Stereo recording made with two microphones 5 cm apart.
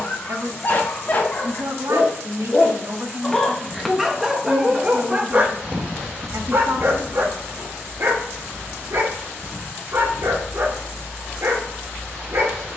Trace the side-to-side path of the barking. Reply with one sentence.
In this clip you hear the barking travel towards the right.